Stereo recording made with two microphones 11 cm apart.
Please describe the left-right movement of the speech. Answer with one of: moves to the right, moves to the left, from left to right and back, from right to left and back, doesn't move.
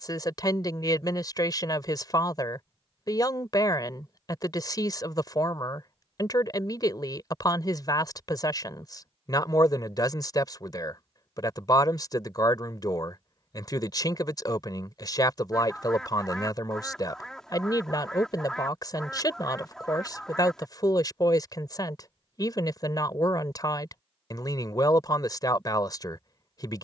doesn't move.